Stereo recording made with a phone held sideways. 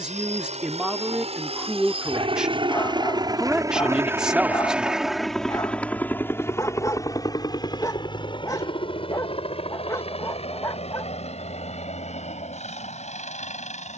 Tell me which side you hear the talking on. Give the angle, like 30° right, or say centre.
10° right.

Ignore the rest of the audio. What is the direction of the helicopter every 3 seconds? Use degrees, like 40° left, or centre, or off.
50° right, 10° right, 30° left, 50° left, 60° left.